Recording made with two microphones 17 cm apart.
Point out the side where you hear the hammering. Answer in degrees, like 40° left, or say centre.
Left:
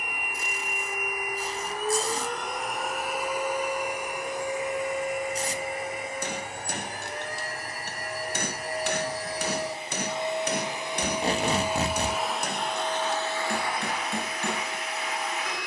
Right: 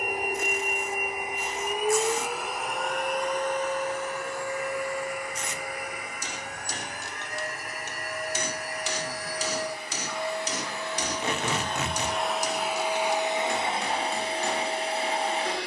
60° left.